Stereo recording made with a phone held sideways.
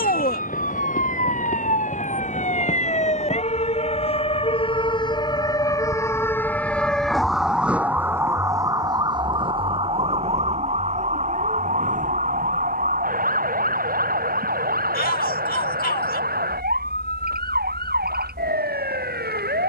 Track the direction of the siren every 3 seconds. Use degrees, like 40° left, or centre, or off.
50° left, 30° left, centre, 40° right, 60° right, 70° right, 70° right.